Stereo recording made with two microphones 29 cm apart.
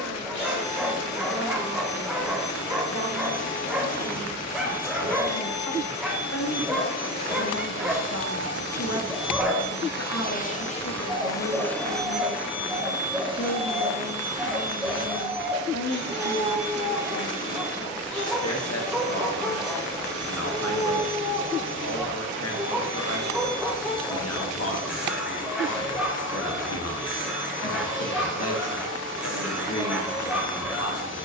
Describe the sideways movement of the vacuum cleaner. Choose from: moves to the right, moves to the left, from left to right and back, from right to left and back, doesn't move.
moves to the right.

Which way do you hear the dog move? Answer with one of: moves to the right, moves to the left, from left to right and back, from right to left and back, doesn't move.
doesn't move.